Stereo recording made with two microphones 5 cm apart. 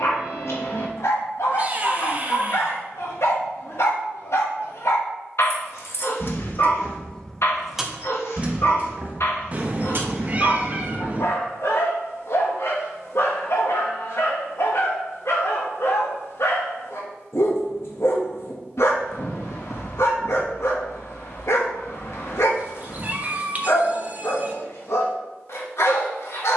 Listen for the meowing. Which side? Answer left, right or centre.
right.